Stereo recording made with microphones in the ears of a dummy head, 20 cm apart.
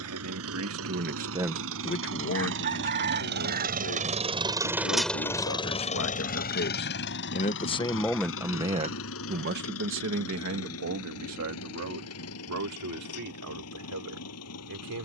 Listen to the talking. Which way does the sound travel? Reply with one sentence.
In this clip you hear the talking move from right to left and back again.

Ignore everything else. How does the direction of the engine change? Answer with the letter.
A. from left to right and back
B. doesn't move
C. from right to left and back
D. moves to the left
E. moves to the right
D.